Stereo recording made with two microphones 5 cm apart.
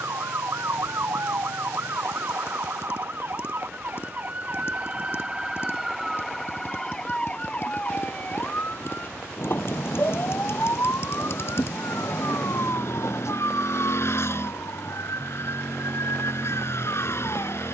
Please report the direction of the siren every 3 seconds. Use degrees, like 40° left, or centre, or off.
60° right, 30° right, 20° left, 50° left, 60° left, 70° left.